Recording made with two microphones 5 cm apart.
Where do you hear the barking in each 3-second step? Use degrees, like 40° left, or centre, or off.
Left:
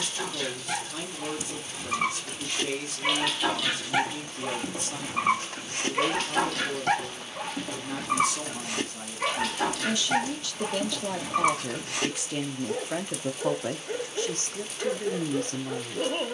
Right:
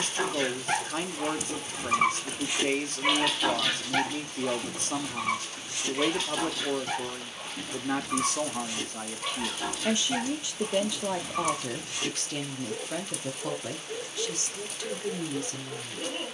20° right, 20° left, 70° left, 70° left, 70° left, 70° left.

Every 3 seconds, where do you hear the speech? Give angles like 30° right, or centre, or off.
50° right, 50° right, 50° right, 20° right, 20° left, 50° left.